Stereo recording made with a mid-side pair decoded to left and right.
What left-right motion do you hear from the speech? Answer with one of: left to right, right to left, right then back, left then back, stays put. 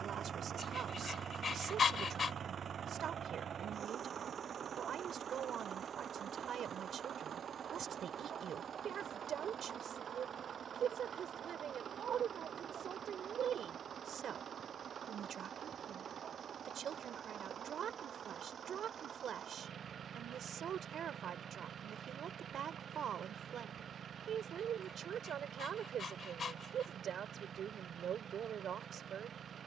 stays put.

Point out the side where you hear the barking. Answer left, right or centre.
left.